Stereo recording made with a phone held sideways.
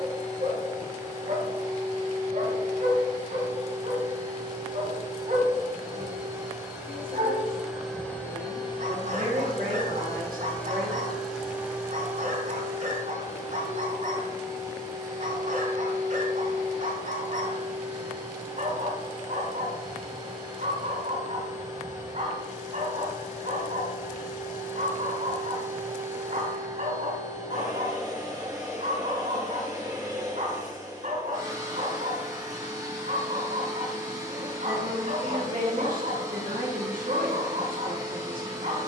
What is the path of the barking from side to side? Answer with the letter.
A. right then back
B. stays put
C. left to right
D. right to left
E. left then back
B.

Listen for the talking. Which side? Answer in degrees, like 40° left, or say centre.
80° right.